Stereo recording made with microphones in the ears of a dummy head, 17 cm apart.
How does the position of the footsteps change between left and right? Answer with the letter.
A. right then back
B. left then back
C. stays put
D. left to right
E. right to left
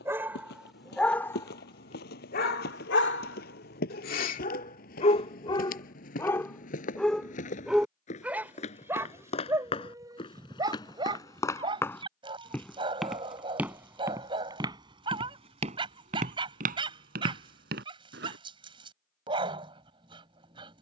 D.